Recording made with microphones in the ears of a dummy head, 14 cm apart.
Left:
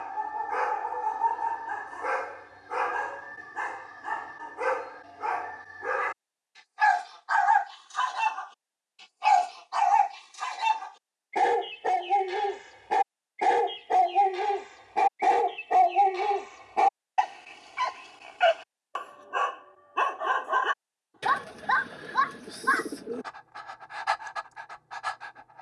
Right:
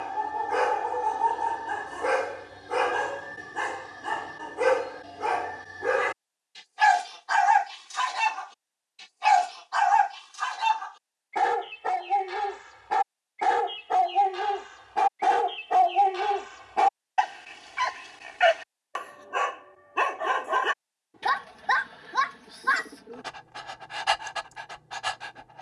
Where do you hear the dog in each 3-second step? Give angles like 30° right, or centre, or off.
40° right, 40° right, 20° right, 20° left, 20° left, 10° left, 10° right, 30° right, 30° right.